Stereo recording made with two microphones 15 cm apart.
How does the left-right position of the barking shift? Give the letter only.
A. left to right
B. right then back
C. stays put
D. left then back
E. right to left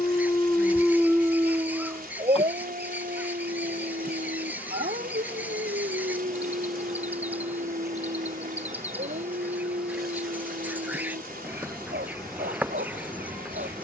A.